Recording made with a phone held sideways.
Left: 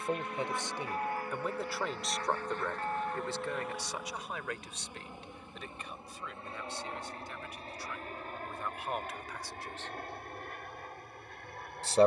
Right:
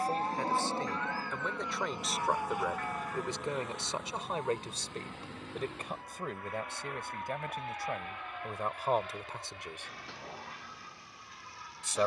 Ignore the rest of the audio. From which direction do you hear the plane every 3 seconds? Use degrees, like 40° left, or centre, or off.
20° right, 10° left, 30° left, 40° left.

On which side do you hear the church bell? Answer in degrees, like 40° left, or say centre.
30° left.